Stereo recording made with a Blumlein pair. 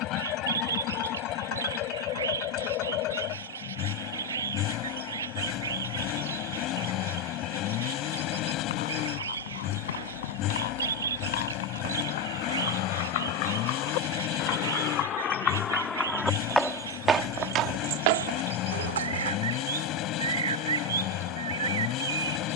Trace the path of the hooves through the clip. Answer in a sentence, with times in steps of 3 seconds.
You can hear the hooves not at all from 0 s, on the left from 6 s, in the centre from 15 s, on the right from 18 s and not at all from 21 s.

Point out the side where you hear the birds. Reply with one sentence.
You can hear the birds on the right.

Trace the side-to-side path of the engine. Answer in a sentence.
You can hear the engine stay put.